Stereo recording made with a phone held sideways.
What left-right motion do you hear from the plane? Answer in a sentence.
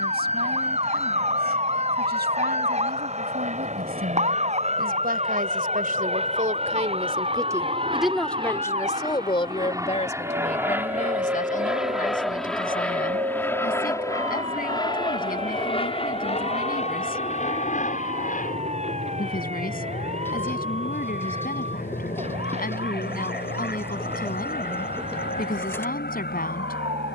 You can hear the plane move to the left.